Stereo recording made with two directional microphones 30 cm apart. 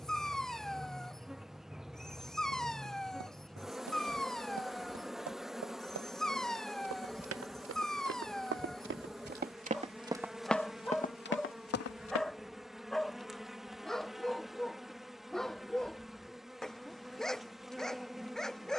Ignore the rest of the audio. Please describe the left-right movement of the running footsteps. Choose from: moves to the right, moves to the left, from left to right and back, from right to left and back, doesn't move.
moves to the left.